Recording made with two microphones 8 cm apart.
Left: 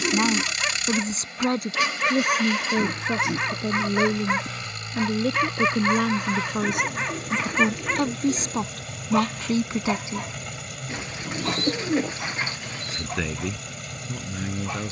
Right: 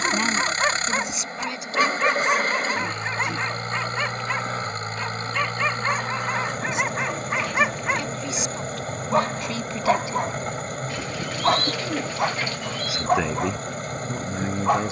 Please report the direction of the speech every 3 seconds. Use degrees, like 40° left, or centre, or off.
40° left, 70° left, 50° left, 30° left, 20° right.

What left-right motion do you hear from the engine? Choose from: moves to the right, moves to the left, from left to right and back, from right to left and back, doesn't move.
doesn't move.